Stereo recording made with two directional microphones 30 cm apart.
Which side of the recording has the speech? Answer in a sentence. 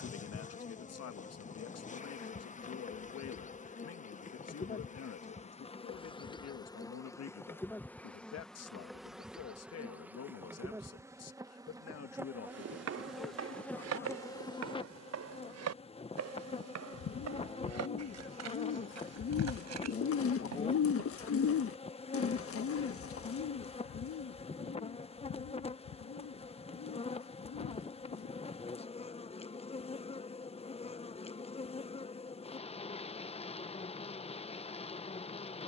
You can hear the speech on the left.